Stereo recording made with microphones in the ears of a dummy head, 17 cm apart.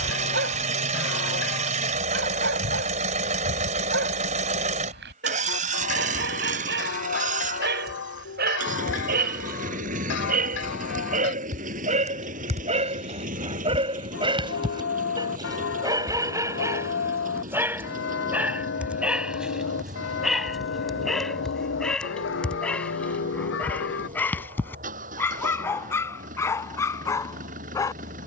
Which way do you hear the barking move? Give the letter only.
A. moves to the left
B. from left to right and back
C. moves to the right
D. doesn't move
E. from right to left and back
A.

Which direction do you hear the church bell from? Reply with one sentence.
In this clip you hear the church bell on the left.